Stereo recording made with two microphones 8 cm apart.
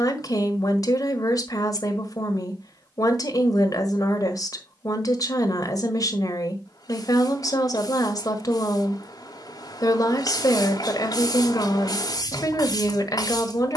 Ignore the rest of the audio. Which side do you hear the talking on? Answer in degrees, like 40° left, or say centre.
50° left.